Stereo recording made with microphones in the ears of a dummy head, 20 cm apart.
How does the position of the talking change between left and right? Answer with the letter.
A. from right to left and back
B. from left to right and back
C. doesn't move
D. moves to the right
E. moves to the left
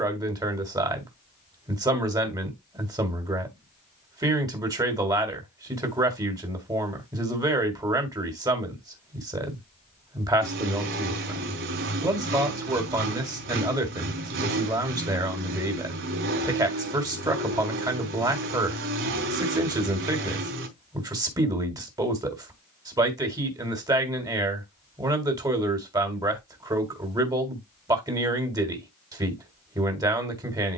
C.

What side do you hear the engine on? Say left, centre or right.
right.